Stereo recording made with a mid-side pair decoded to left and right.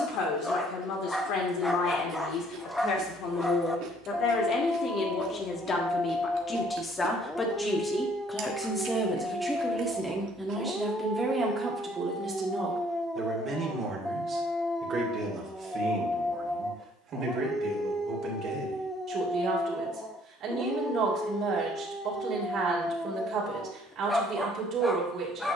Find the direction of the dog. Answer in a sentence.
You can hear the dog in the centre.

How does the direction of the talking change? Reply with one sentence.
In this clip you hear the talking travel towards the right.